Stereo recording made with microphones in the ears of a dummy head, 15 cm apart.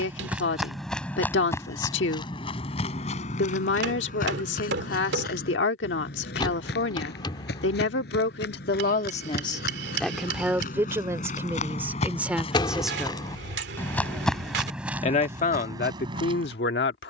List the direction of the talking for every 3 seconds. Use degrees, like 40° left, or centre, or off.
80° left, 80° left, 80° left, centre, 10° right, 60° left.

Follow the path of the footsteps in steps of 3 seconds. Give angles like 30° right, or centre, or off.
10° left, 50° left, 70° left, 50° left, 20° left, 20° right.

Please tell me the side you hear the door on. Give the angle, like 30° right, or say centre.
30° left.